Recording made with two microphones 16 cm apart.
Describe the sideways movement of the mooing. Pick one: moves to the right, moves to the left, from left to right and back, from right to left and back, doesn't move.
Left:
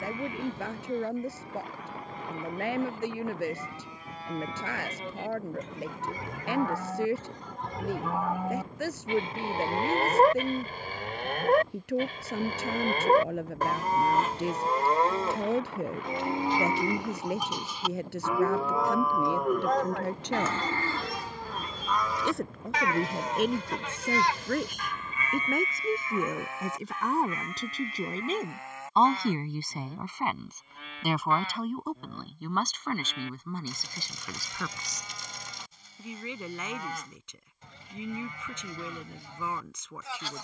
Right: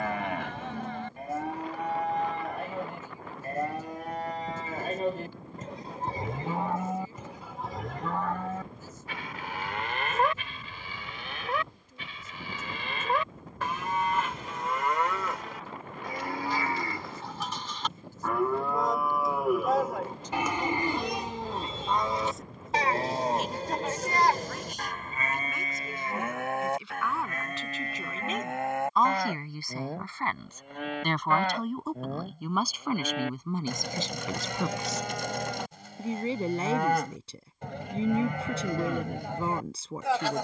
from right to left and back.